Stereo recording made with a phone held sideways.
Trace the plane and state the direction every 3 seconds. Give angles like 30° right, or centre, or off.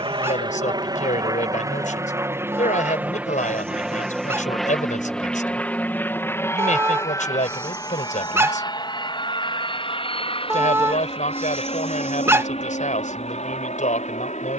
30° right, centre, 20° left, 40° left, 50° left.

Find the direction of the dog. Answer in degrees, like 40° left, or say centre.
20° right.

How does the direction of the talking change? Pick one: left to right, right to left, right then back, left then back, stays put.
stays put.